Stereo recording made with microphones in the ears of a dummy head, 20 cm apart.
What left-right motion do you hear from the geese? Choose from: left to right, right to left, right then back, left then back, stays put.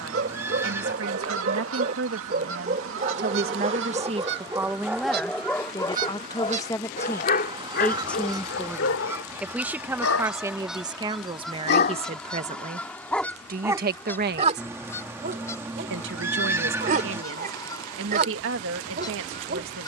right to left.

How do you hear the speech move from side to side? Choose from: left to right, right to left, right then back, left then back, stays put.
left then back.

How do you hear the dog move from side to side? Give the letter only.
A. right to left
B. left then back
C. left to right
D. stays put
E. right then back
B.